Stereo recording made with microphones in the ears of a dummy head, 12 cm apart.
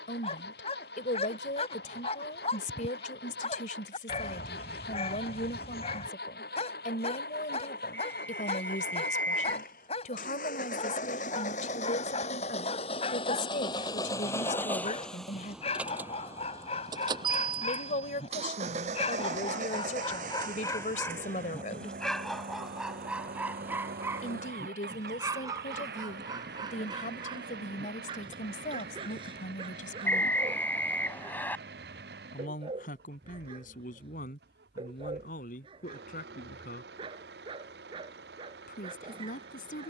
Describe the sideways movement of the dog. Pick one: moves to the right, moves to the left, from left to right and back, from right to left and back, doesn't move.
moves to the right.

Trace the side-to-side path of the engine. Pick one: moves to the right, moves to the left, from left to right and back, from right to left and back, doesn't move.
moves to the right.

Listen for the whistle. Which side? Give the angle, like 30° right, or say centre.
10° left.